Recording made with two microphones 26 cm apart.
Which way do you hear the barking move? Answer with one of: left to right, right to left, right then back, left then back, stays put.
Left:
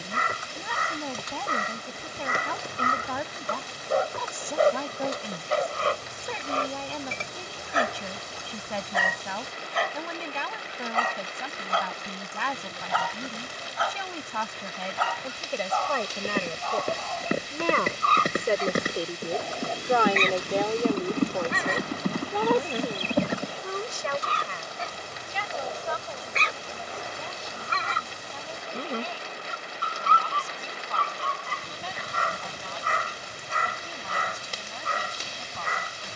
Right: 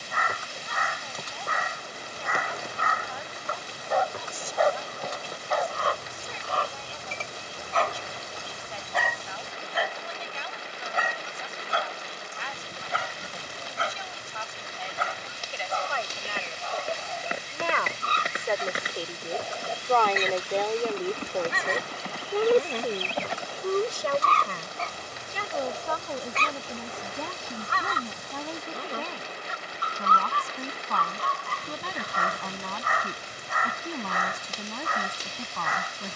right then back.